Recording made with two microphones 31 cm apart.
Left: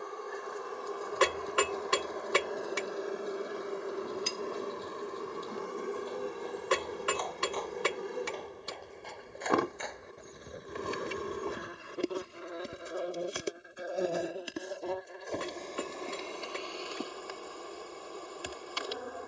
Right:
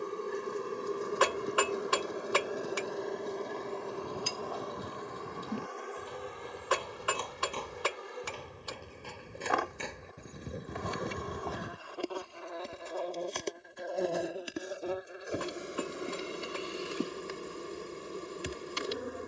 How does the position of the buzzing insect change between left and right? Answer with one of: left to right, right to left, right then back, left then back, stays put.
left then back.